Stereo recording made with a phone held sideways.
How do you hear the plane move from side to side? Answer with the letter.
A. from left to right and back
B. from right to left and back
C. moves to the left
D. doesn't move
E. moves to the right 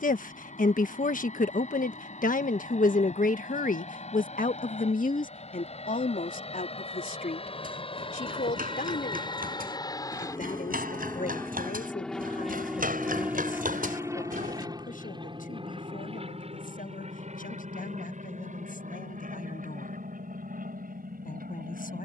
E.